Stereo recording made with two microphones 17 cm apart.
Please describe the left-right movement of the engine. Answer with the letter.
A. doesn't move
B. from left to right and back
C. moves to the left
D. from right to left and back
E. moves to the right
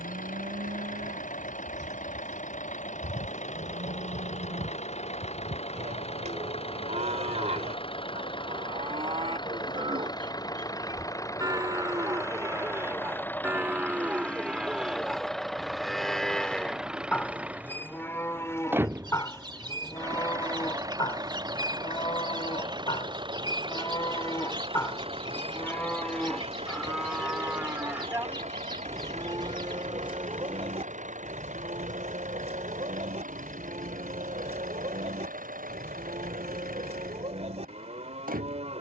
E.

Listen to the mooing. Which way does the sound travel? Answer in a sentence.
In this clip you hear the mooing move from right to left and back again.